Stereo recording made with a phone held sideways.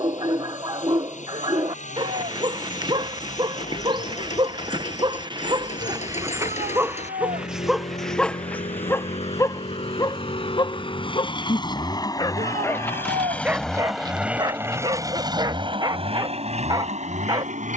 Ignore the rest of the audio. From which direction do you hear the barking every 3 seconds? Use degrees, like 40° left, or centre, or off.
30° right, 30° right, 10° right, 30° left, 10° right, 30° right.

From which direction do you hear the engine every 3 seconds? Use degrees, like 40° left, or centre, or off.
60° left, 60° left, 50° left, 40° left, 10° left, 50° right.